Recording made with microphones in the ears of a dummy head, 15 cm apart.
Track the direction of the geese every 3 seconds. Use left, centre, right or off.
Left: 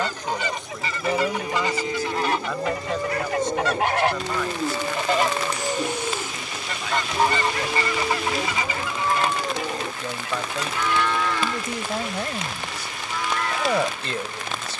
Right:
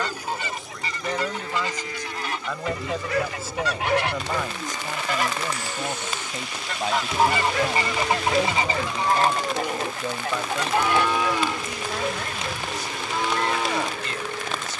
left, left, centre, right, right.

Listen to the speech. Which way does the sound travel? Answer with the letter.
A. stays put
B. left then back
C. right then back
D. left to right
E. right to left
C.